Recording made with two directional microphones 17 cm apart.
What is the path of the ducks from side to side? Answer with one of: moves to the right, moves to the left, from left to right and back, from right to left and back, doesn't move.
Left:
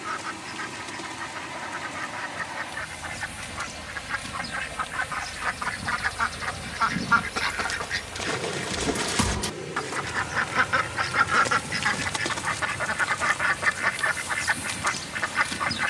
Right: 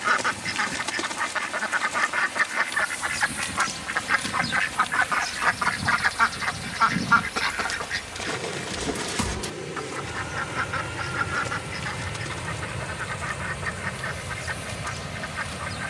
moves to the left.